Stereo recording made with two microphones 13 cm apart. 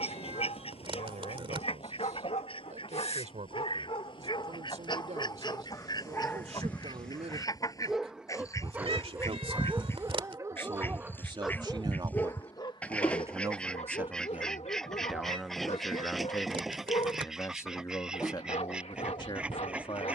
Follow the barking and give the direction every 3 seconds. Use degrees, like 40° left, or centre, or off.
60° left, 40° left, centre, 10° right, 50° left, 60° left, 60° left.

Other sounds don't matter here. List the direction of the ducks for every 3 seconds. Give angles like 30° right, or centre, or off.
50° left, 40° left, 30° left, 20° left, 10° left, centre, 10° right.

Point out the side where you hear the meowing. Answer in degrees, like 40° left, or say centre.
50° right.